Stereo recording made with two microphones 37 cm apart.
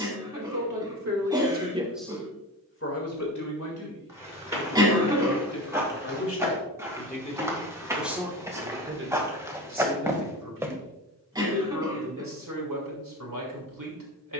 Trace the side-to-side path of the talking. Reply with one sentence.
In this clip you hear the talking go left and come back.